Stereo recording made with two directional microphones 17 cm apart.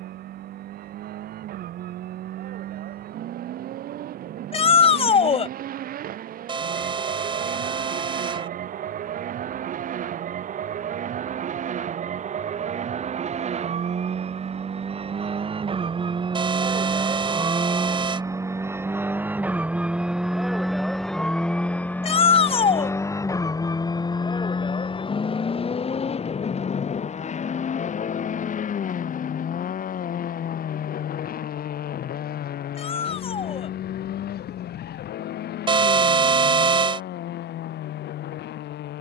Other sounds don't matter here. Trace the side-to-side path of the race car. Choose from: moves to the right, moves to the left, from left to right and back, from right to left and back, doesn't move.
moves to the left.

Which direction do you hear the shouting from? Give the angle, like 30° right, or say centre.
30° left.